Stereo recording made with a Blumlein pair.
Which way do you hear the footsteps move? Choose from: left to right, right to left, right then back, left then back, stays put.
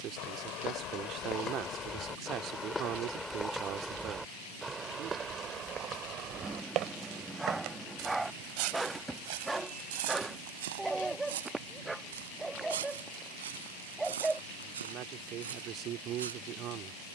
left to right.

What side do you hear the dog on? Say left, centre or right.
centre.